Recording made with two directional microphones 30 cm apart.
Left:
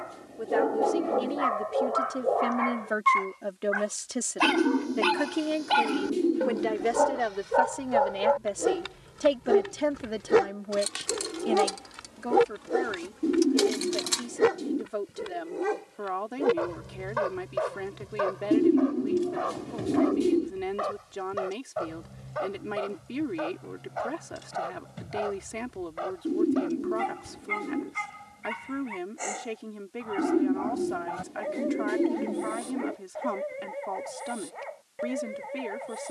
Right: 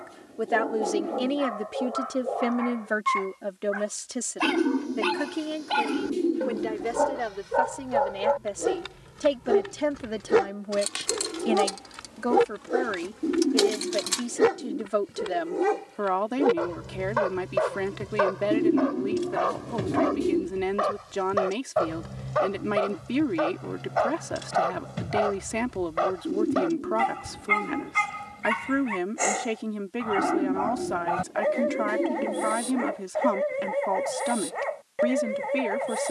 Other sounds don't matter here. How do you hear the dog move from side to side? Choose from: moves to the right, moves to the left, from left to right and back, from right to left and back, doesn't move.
moves to the right.